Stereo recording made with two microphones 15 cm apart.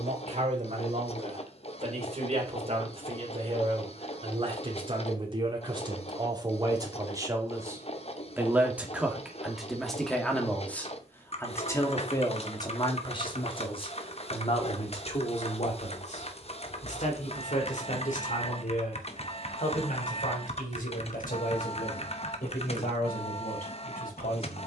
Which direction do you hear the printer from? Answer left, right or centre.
left.